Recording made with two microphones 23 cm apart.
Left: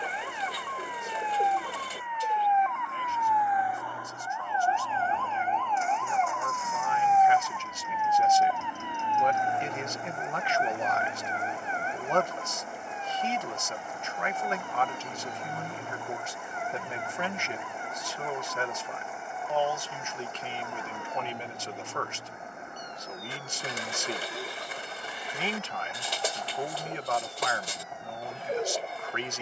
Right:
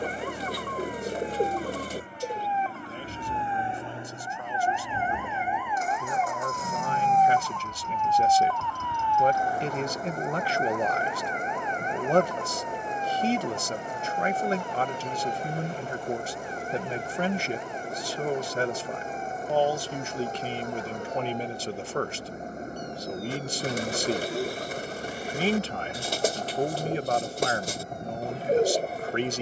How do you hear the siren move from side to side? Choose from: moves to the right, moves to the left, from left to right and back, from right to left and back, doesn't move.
moves to the left.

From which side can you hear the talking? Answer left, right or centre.
right.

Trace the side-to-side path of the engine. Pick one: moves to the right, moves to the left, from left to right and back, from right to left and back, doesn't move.
doesn't move.